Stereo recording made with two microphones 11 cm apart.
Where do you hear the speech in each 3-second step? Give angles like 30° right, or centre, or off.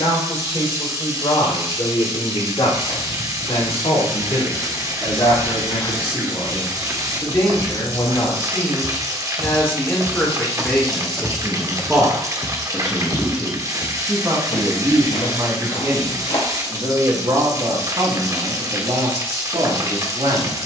60° left, 50° left, 40° left, 10° left, 20° right, 40° right, 60° right.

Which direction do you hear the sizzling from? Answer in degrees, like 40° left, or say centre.
30° right.